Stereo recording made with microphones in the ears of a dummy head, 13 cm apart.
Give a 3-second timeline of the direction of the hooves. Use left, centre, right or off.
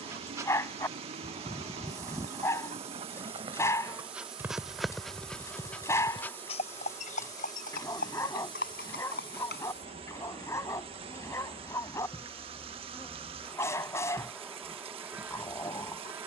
right, centre, left, left, off, off.